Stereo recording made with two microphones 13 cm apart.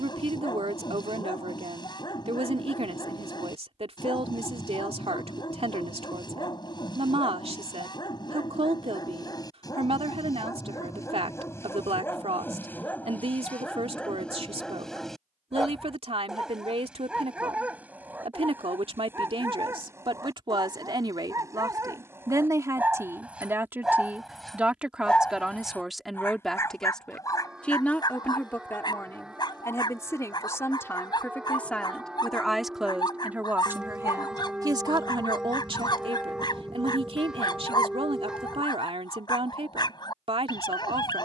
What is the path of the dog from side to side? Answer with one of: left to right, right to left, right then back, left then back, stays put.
right then back.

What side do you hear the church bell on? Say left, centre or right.
centre.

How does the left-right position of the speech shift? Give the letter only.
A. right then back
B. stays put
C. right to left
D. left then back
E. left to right
D.